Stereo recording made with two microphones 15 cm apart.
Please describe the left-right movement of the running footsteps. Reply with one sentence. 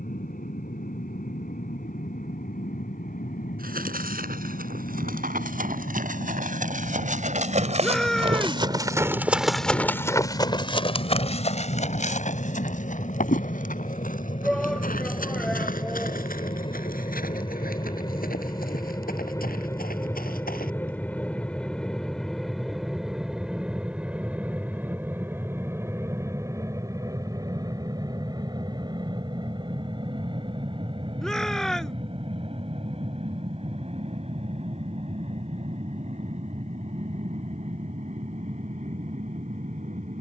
You can hear the running footsteps move from right to left.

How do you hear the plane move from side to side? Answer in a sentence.
In this clip you hear the plane move from left to right.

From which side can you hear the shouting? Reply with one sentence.
You can hear the shouting in the centre.